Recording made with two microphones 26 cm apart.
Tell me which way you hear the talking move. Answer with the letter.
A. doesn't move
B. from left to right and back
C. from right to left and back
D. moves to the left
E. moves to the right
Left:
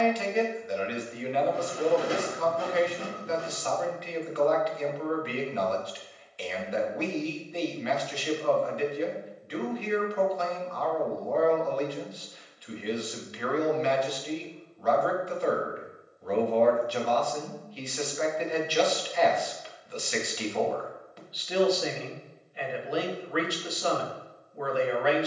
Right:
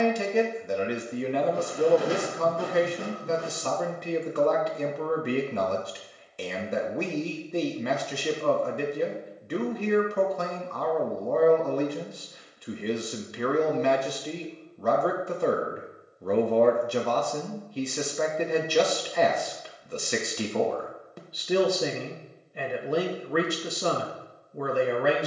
A.